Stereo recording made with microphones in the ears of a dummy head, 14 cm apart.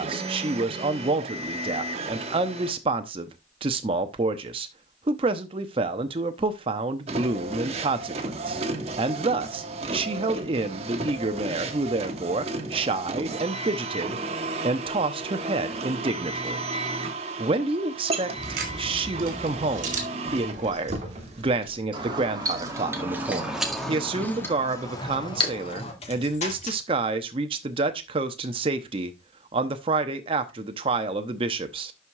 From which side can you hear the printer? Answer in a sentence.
You can hear the printer on the right.